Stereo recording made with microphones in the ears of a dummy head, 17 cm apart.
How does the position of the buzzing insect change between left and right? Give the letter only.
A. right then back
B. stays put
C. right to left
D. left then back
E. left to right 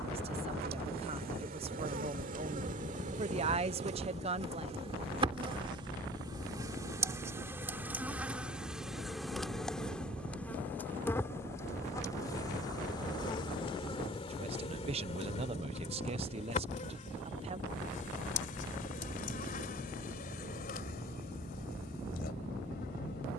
C.